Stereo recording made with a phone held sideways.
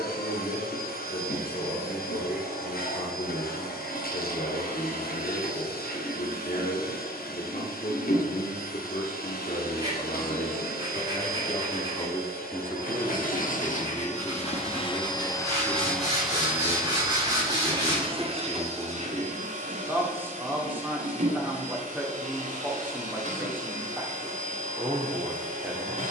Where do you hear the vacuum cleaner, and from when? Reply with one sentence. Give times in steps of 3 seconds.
In this clip you hear the vacuum cleaner on the left from 0 s, in the centre from 15 s and on the right from 18 s.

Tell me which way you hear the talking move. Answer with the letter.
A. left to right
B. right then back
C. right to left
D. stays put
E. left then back
A.